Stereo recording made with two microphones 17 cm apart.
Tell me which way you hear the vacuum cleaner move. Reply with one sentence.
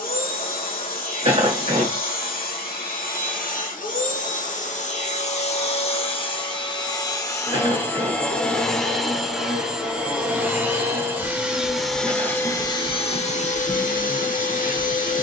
You can hear the vacuum cleaner move from left to right and back again.